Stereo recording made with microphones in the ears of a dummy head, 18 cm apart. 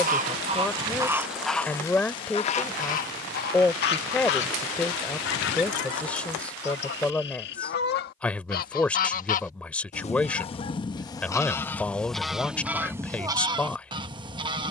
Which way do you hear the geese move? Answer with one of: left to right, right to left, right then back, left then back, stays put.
left then back.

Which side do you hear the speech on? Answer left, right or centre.
centre.